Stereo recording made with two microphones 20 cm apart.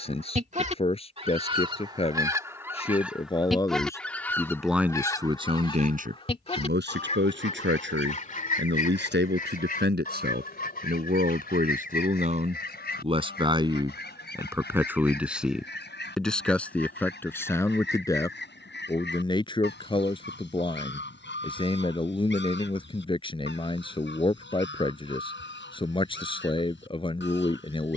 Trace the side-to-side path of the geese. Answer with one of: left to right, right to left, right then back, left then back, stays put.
right to left.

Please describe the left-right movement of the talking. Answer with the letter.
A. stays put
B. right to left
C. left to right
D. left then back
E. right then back
E.